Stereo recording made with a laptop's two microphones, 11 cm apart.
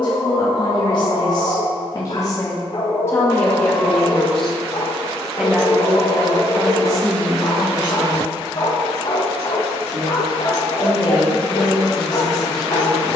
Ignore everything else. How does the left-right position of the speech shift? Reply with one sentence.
In this clip you hear the speech move to the right.